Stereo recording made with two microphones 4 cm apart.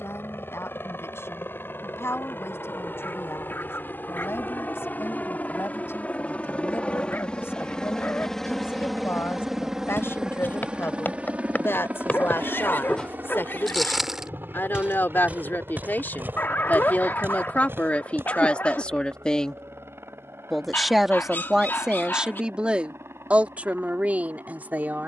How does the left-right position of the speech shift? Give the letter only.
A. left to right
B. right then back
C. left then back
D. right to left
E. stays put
A.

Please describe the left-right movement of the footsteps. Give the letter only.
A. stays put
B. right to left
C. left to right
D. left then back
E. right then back
C.